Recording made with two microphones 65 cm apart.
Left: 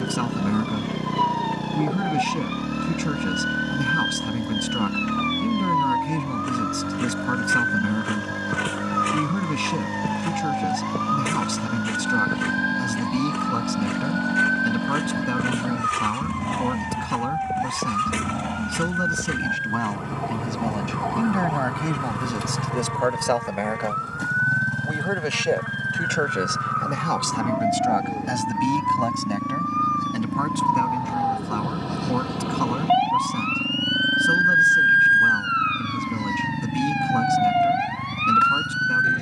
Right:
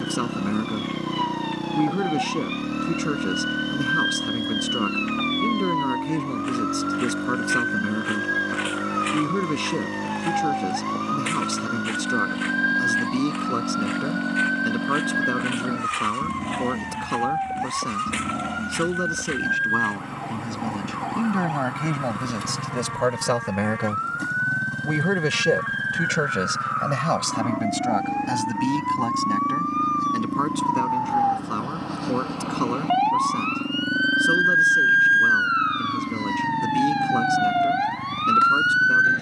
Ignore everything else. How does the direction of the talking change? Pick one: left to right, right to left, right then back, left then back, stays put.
right then back.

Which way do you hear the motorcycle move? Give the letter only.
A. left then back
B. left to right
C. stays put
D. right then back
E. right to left
C.